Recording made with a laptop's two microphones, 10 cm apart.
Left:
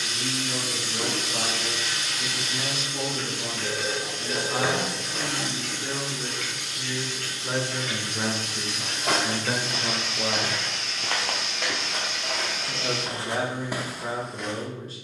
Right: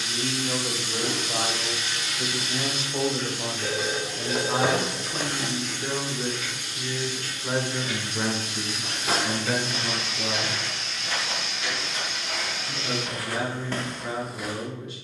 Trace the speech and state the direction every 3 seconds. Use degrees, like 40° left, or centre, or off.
60° right, 40° right, 10° right, 20° left, 40° left.